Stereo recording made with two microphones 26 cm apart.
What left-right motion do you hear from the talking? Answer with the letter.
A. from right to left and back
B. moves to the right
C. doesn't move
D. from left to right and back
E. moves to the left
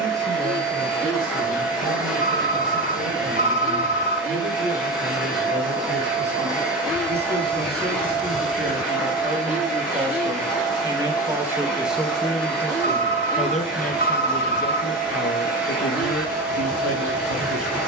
E.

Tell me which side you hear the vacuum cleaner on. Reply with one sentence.
In this clip you hear the vacuum cleaner in the centre.